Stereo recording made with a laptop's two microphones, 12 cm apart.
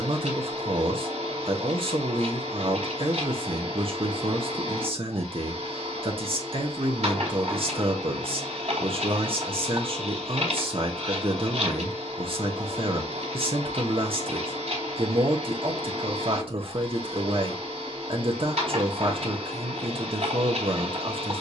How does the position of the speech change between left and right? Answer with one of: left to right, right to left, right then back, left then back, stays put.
stays put.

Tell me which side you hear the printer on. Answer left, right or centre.
right.